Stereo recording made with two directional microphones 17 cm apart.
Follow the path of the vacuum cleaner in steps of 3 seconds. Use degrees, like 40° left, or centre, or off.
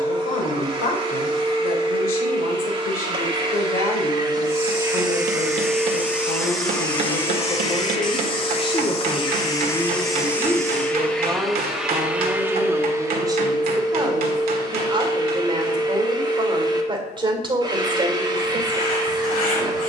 30° right, 20° right, 20° left, 10° left, 20° right, 30° right, 30° right.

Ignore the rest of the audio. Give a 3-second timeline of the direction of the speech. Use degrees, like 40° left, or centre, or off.
60° left, 60° left, 40° left, 10° left, 20° right, 30° right, 30° right.